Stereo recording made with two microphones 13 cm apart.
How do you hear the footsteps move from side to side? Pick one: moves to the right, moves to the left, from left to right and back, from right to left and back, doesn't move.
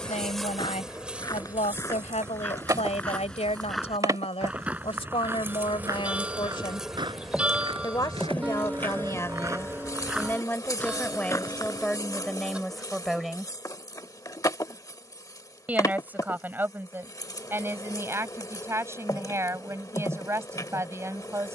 from left to right and back.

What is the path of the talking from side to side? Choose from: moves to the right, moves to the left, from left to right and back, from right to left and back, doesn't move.
moves to the right.